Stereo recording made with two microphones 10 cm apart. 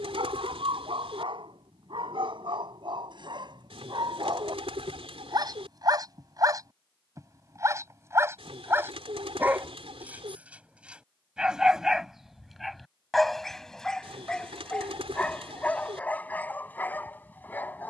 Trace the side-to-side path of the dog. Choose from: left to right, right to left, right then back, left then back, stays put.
right to left.